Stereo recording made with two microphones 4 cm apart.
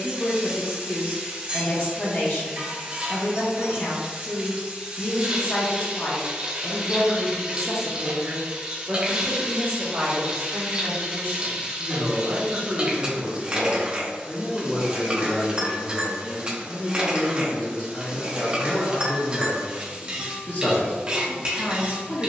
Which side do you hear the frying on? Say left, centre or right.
right.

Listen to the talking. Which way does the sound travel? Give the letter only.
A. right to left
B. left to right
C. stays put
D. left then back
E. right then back
E.